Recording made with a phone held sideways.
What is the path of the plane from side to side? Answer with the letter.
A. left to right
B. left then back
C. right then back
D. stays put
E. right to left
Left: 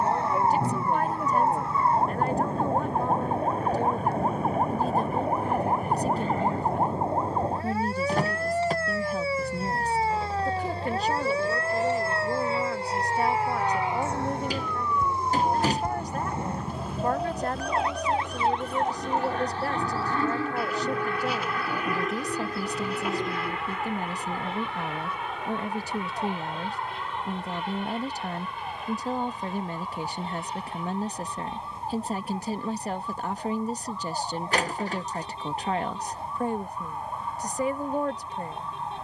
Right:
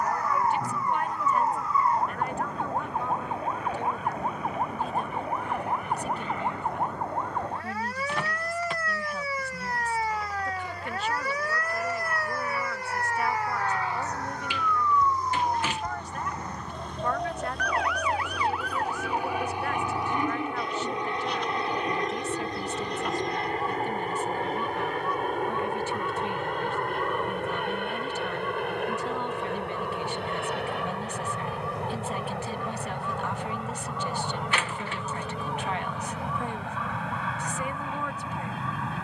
A.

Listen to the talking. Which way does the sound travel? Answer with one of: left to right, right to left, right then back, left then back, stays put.
stays put.